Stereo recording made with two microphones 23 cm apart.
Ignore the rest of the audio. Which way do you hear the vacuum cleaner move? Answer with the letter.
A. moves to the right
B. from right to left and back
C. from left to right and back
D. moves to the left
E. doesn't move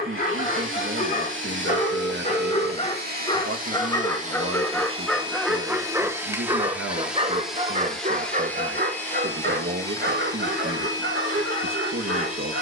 D.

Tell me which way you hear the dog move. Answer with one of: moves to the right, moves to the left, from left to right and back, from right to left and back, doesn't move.
moves to the right.